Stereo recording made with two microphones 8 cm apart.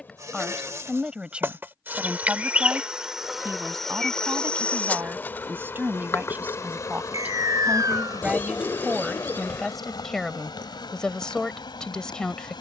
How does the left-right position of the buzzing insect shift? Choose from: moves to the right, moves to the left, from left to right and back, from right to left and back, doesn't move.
moves to the left.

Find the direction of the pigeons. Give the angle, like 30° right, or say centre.
20° left.